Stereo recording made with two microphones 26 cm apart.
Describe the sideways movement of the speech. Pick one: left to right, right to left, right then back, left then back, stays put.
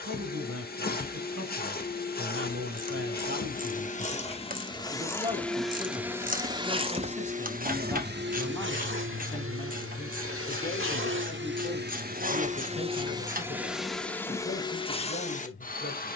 right to left.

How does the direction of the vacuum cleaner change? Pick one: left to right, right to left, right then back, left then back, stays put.
right then back.